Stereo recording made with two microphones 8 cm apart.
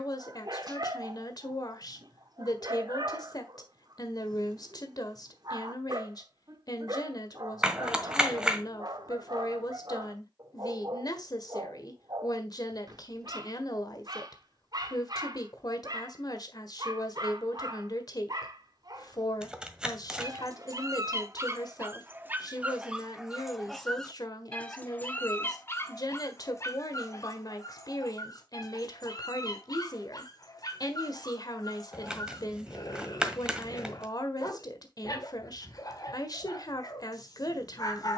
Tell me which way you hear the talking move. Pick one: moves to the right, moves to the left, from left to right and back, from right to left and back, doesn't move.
doesn't move.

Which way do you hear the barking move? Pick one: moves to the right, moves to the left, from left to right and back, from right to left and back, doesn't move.
moves to the left.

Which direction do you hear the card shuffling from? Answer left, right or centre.
centre.